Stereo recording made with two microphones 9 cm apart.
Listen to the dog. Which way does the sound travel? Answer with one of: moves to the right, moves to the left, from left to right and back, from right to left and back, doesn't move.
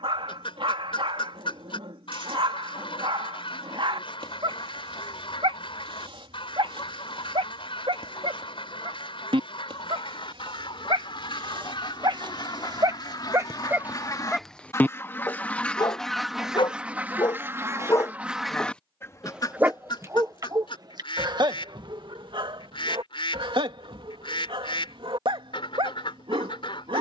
from right to left and back.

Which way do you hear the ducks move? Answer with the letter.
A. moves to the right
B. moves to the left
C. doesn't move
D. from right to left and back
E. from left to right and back
E.